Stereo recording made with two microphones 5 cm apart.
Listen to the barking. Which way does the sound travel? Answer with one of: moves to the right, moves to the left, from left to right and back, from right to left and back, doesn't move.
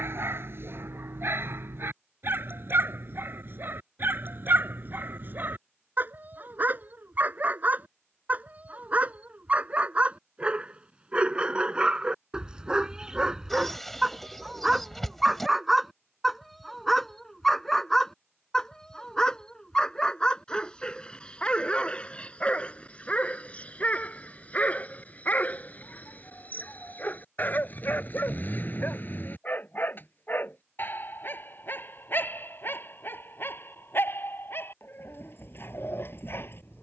moves to the left.